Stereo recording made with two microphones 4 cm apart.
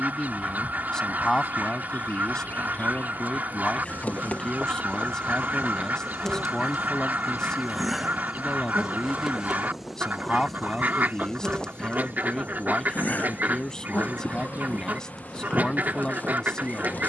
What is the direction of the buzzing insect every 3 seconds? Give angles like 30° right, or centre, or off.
50° left, 30° left, centre, centre, 40° left, 40° left.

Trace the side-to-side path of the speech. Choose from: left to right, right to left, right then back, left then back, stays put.
stays put.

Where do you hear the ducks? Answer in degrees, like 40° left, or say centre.
50° right.